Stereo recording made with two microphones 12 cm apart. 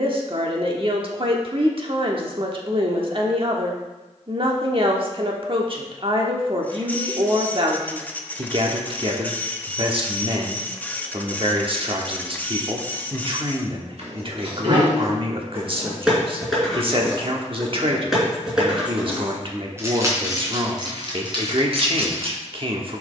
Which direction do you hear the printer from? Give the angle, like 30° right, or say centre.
10° left.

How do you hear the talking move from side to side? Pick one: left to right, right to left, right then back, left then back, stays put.
stays put.